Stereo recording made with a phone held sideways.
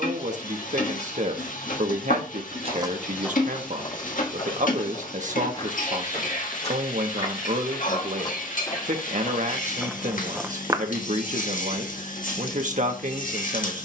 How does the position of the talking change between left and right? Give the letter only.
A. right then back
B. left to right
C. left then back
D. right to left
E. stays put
E.